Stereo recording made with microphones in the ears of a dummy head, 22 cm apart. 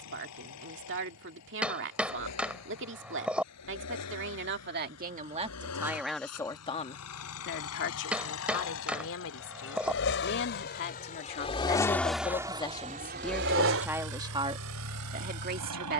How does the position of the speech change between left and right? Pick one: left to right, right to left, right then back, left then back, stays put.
left then back.